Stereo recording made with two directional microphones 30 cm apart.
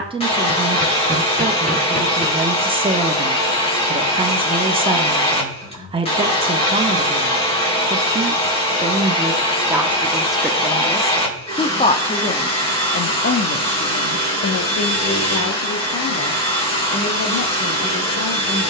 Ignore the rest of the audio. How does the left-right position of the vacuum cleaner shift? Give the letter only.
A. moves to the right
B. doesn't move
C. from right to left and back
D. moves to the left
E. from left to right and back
B.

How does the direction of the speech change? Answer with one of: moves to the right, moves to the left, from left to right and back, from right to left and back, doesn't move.
moves to the left.